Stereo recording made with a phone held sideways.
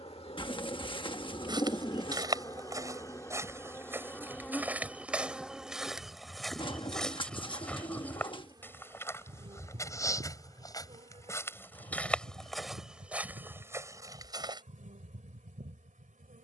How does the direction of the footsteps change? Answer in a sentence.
In this clip you hear the footsteps go left and come back.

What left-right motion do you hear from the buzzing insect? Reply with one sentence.
You can hear the buzzing insect go from the left side to the right.